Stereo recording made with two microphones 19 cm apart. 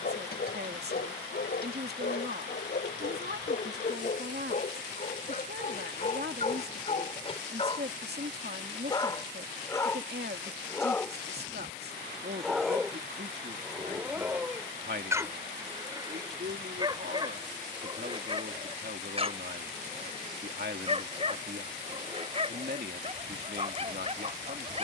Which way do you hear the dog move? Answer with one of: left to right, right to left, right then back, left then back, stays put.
left to right.